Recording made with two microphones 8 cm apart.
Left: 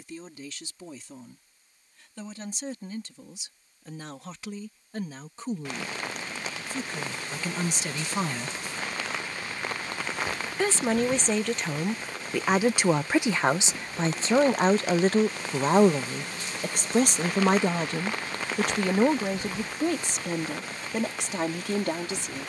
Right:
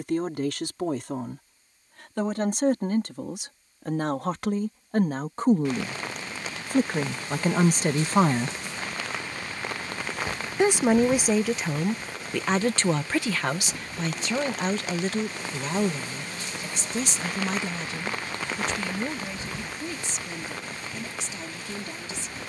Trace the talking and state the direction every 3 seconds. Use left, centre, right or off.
right, right, right, centre, left, left, left, left.